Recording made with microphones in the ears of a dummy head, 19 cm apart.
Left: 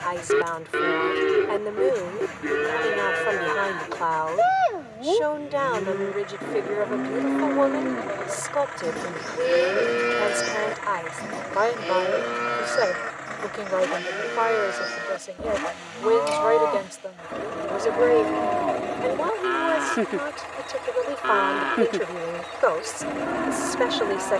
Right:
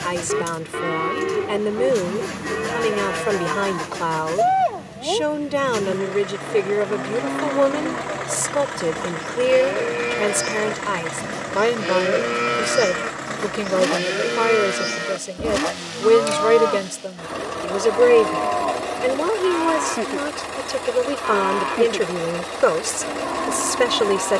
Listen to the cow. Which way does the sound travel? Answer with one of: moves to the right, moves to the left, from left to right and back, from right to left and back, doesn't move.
from left to right and back.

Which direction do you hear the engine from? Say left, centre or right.
right.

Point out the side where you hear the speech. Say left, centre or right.
right.